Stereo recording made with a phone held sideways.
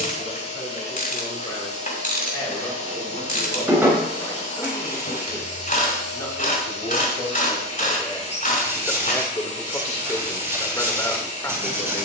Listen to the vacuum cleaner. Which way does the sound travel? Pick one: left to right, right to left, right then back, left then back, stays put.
stays put.